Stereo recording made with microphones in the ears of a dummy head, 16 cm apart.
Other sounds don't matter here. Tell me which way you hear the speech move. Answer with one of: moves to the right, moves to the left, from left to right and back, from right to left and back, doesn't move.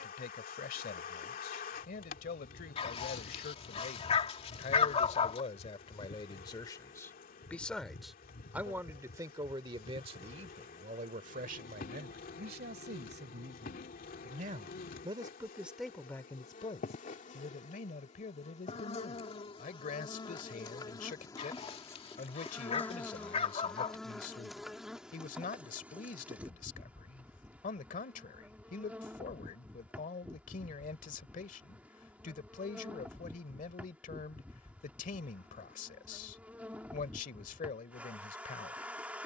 from left to right and back.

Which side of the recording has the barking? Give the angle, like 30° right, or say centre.
30° left.